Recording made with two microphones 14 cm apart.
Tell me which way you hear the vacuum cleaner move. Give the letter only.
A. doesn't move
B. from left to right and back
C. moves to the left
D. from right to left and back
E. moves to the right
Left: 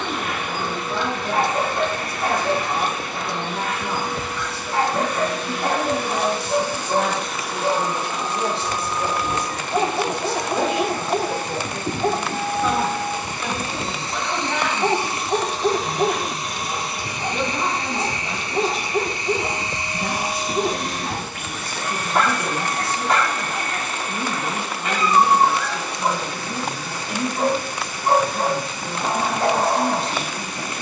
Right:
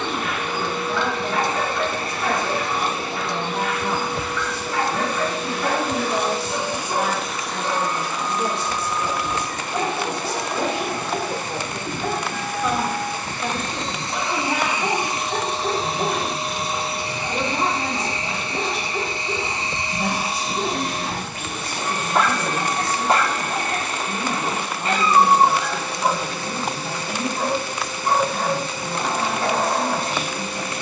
D.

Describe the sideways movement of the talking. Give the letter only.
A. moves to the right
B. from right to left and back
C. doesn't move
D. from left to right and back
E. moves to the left
B.